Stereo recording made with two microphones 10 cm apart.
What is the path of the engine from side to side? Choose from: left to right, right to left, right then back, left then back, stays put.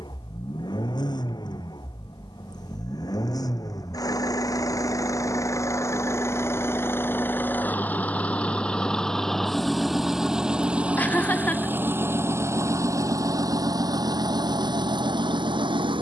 left to right.